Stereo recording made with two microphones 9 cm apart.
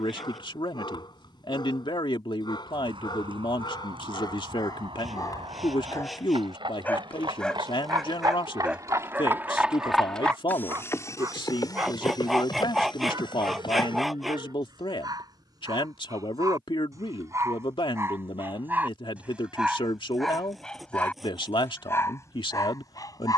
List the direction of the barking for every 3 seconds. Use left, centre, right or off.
left, left, centre, right, right, right, centre, left.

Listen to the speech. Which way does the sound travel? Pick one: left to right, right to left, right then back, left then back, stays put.
stays put.